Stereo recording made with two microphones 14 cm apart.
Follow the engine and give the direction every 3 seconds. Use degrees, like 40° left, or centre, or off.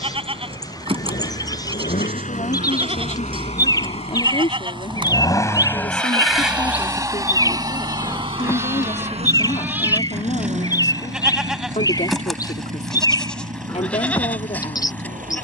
70° left, 40° left, 30° right, 60° right, 70° right.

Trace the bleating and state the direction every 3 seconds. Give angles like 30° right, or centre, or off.
40° right, 40° right, 30° right, 10° right, 10° left.